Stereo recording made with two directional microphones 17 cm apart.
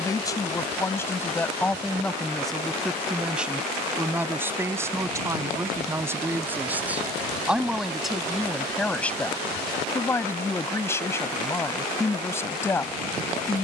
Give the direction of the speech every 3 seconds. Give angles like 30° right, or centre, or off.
10° left, 10° right, centre, 10° left, 10° left.